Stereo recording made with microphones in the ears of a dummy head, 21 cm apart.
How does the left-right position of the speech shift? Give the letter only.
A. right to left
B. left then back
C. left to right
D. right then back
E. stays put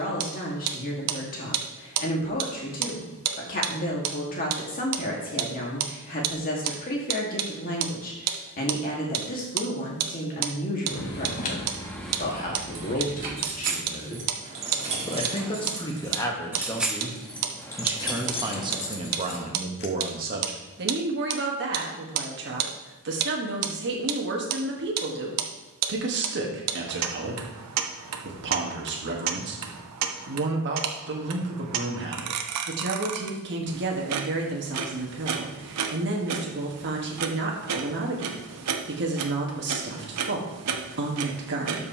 C.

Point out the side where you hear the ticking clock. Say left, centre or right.
right.